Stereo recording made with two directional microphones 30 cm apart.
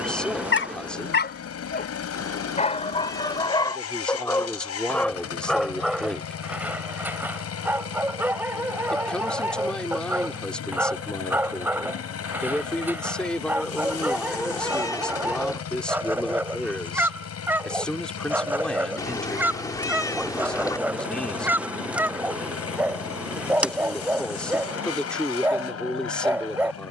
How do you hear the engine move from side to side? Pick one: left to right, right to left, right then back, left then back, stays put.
stays put.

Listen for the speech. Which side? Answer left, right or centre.
centre.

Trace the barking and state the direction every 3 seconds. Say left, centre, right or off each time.
left, centre, centre, centre, centre, centre, centre, centre, centre.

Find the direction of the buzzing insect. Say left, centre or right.
centre.